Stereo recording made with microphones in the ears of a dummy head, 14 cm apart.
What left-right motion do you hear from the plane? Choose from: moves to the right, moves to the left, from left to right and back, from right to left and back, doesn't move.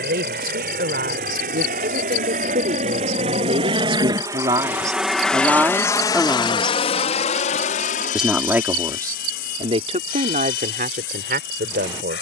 moves to the left.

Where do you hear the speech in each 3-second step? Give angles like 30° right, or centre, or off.
60° right, 30° right, 10° right, 50° right.